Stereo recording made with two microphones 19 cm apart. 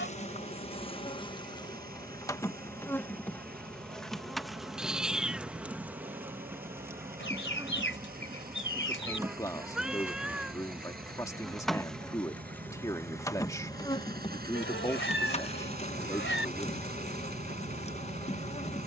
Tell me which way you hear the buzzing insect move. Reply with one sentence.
You can hear the buzzing insect move from left to right and back again.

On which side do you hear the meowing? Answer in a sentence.
You can hear the meowing in the centre.